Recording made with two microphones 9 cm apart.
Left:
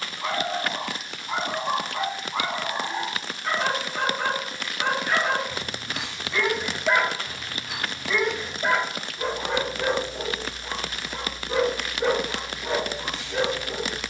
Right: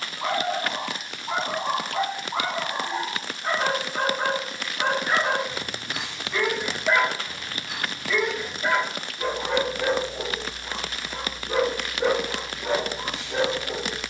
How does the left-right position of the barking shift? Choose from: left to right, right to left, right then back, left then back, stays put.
left then back.